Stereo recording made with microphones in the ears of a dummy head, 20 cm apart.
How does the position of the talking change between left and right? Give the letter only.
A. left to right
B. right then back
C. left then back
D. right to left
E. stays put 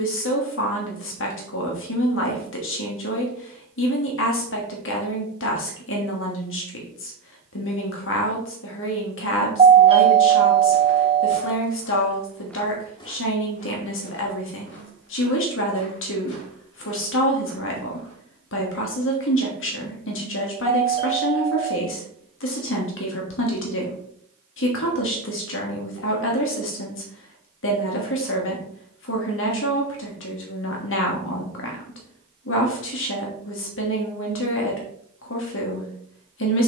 E.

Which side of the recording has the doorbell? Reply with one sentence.
You can hear the doorbell on the right.